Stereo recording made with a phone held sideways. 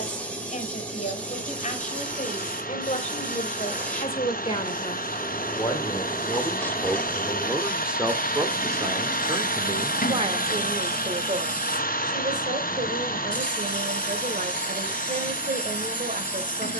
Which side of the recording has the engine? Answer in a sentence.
You can hear the engine on the left.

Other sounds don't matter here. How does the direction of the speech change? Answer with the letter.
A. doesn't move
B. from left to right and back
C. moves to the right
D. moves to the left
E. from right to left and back
C.